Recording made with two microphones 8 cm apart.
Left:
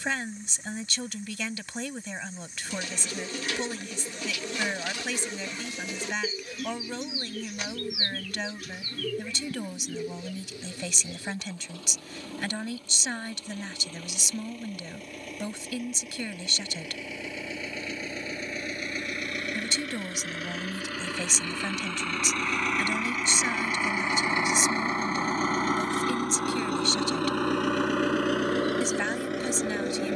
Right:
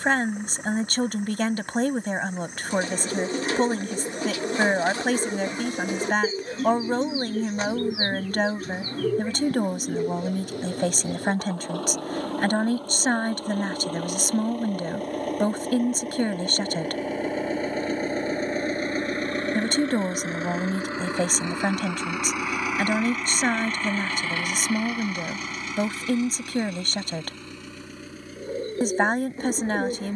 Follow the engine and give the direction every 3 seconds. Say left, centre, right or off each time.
right, right, right, right, right, right, right, centre, left, left.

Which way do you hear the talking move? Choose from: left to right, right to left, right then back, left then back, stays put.
stays put.